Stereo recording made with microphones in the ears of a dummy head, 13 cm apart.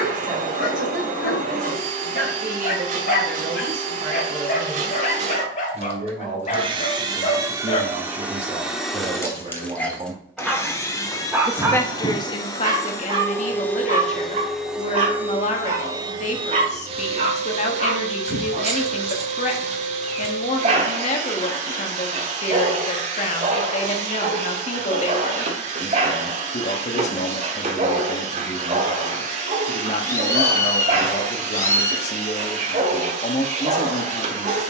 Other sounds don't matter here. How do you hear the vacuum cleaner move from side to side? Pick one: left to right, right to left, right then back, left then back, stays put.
left then back.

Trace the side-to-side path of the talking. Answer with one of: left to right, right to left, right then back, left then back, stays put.
right to left.